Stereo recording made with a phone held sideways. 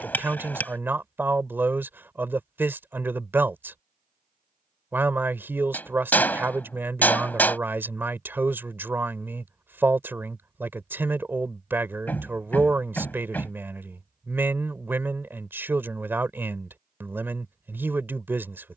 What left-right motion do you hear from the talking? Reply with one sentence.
In this clip you hear the talking stay put.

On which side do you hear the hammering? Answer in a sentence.
In this clip you hear the hammering in the centre.